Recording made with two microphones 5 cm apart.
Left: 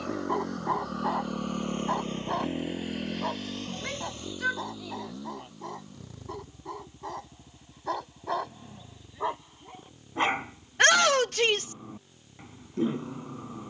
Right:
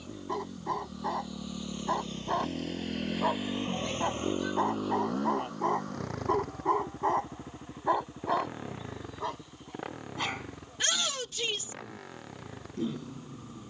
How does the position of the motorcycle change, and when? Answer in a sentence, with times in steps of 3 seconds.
In this clip you hear the motorcycle on the left from 0 s and on the right from 3 s.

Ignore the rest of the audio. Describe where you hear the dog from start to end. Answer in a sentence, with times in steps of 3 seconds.
In this clip you hear the dog in the centre from 0 s, on the right from 3 s and on the left from 9 s.